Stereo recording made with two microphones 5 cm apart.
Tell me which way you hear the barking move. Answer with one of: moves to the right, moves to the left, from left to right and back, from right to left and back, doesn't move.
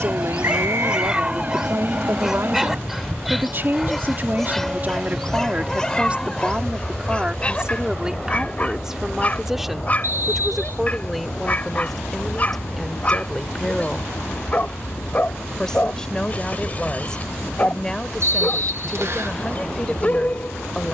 moves to the left.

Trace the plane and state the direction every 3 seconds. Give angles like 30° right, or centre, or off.
40° right, 20° right, centre, 20° left, 40° left, 40° left, 50° left.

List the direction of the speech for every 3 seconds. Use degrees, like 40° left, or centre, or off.
60° right, 40° right, 20° right, centre, 10° left, 10° left, 10° left.